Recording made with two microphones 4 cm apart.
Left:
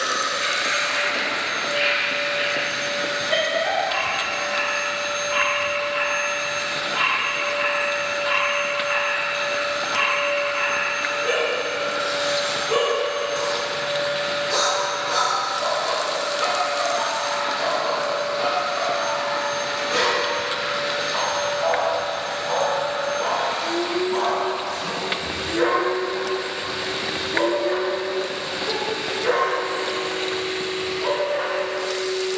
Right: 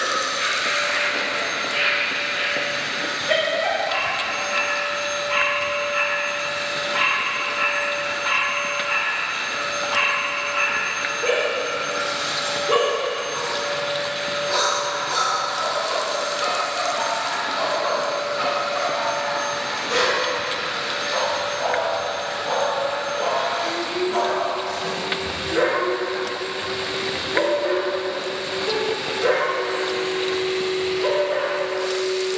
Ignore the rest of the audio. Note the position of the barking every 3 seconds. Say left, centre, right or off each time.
right, right, right, right, right, centre, right, right, right, right, right.